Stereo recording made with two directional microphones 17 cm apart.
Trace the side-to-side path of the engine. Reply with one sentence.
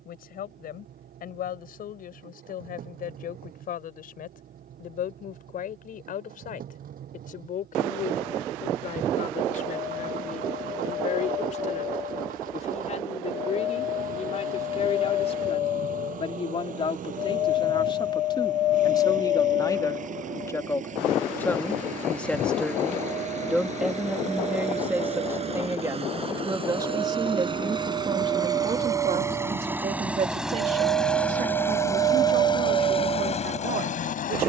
In this clip you hear the engine go from the right side to the left.